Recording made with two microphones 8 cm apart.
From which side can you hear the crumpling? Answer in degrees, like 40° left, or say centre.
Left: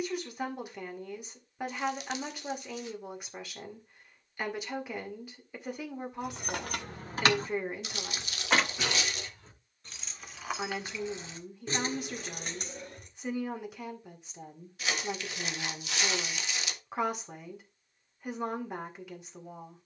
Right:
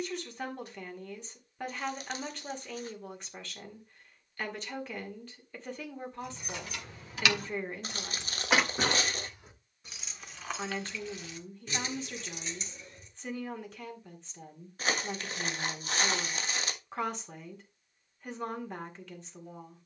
40° right.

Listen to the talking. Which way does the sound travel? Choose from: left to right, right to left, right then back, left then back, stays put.
stays put.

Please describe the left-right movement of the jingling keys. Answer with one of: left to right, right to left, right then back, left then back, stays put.
right then back.